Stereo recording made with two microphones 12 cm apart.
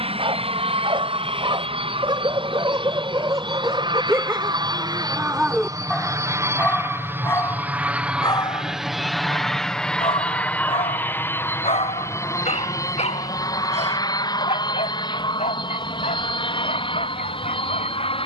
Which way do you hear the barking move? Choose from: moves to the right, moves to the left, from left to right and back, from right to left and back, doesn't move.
moves to the left.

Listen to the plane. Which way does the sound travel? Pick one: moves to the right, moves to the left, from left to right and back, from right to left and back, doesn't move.
moves to the left.